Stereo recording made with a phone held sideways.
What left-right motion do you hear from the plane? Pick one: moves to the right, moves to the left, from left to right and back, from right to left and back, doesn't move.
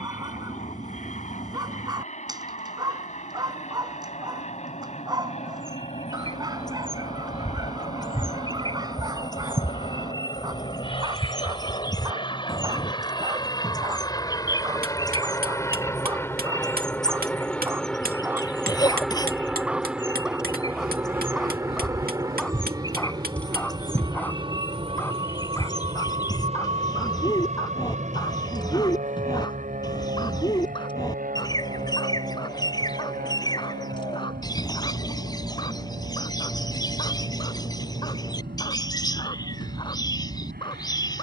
moves to the right.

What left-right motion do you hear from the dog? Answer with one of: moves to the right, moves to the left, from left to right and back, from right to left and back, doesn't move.
moves to the left.